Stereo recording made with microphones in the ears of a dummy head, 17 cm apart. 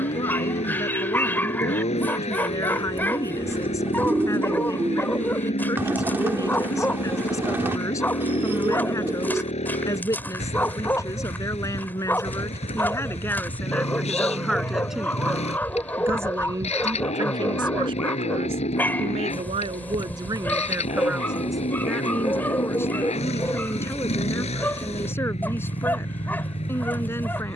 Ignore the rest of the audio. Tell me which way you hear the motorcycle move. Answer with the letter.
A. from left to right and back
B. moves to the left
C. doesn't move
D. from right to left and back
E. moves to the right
C.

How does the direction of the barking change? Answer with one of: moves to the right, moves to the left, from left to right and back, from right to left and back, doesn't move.
doesn't move.